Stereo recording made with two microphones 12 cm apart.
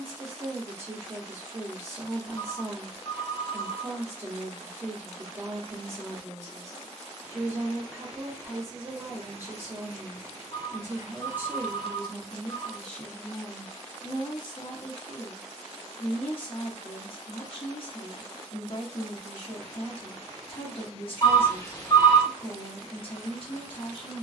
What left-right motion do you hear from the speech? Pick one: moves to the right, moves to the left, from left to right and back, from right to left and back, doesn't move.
moves to the left.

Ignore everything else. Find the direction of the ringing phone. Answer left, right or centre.
left.